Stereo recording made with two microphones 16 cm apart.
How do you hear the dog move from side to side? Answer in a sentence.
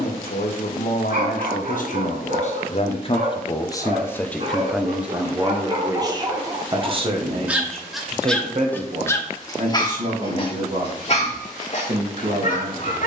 In this clip you hear the dog move to the left.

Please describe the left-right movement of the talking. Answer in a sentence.
In this clip you hear the talking go from the left side to the right.